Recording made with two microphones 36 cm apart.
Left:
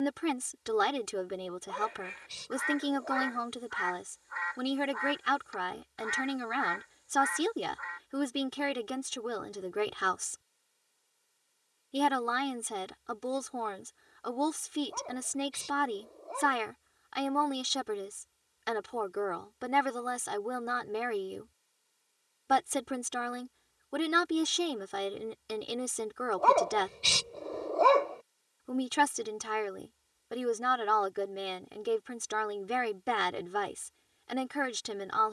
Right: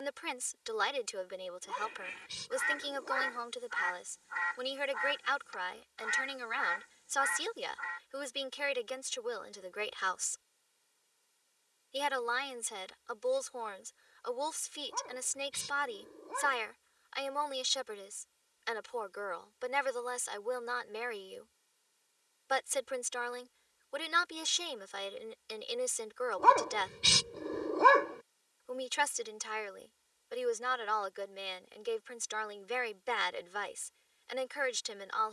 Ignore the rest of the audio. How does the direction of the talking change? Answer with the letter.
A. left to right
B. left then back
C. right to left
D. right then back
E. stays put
E.